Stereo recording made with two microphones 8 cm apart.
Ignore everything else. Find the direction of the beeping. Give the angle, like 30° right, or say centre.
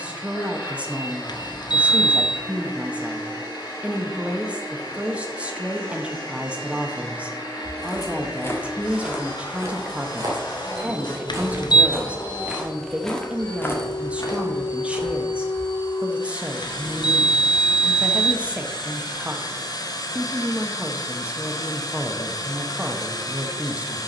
60° left.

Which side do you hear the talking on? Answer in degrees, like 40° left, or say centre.
20° right.